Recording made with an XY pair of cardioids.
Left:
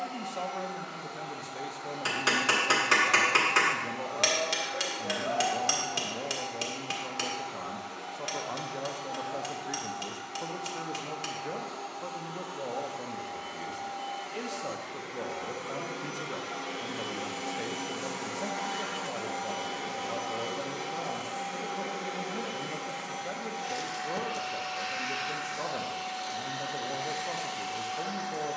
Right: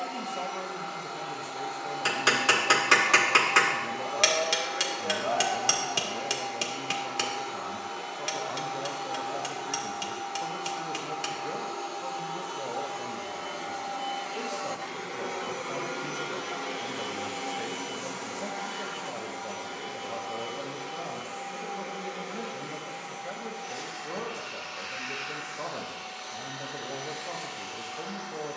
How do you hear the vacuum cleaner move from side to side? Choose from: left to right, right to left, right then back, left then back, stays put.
right to left.